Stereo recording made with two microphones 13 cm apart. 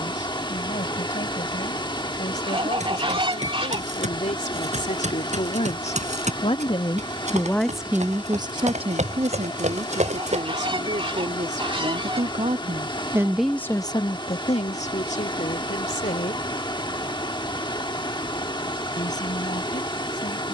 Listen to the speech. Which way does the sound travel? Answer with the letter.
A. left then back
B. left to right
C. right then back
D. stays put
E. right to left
C.